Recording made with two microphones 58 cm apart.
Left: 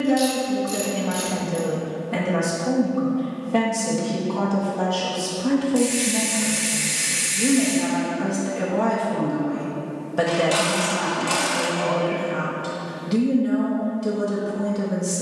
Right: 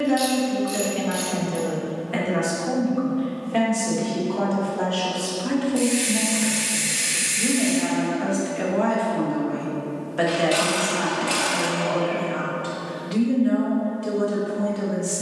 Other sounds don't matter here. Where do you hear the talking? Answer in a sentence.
In this clip you hear the talking on the left.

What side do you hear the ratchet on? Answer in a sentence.
In this clip you hear the ratchet on the left.